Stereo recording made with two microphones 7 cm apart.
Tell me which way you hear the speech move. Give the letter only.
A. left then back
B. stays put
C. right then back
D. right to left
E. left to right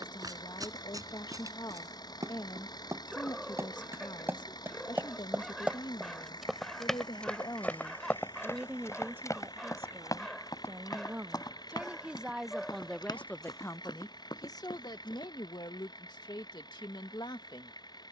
C.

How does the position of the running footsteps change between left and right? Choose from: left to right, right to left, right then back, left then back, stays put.
right to left.